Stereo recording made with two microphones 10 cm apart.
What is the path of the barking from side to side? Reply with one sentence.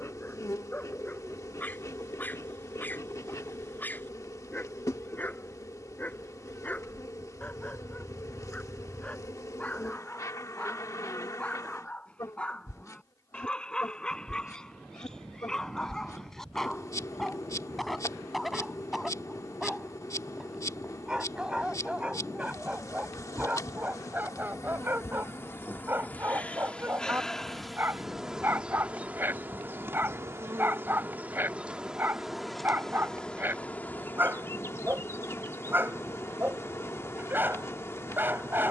In this clip you hear the barking go from the left side to the right.